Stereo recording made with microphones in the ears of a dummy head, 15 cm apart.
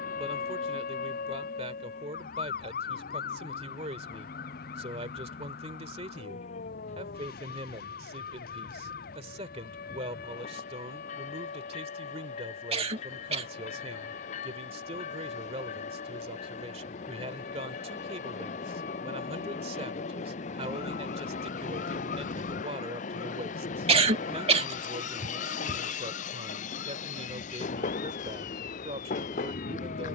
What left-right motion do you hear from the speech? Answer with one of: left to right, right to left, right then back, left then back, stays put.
stays put.